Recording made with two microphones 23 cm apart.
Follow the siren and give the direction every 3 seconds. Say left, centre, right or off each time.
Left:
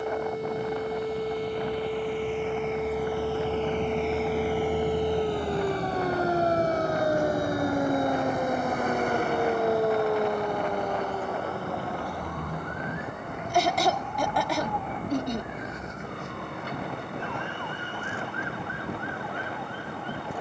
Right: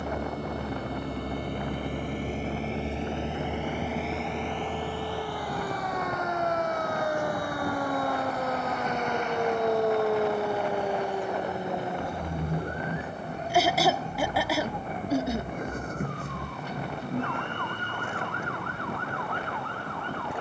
left, left, left, centre, right, right, right.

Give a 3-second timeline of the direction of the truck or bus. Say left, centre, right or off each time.
right, centre, left, left, left, left, left.